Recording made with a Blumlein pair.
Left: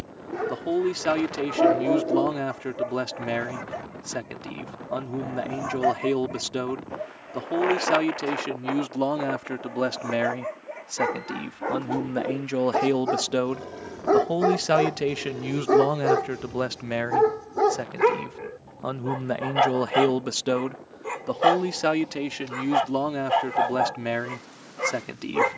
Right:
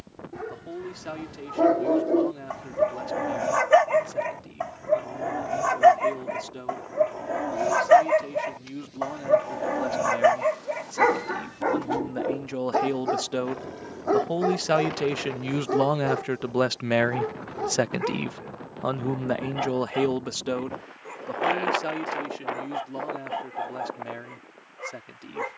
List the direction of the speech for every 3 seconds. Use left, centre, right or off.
left, left, left, left, centre, centre, centre, left, left.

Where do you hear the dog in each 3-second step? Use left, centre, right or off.
centre, right, right, right, centre, left, left, left, left.